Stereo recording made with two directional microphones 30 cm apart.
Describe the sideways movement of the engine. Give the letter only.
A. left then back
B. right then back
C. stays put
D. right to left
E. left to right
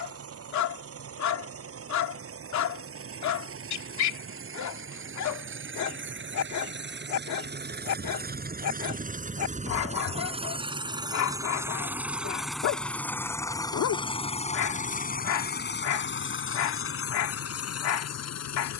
D.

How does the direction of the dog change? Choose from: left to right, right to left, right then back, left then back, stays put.
stays put.